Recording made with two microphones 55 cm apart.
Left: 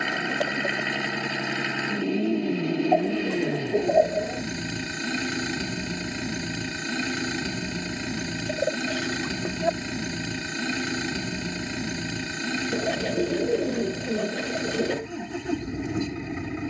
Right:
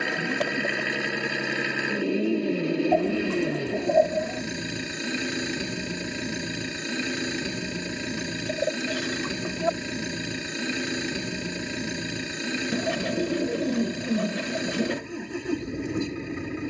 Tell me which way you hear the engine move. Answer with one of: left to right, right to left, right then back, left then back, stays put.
stays put.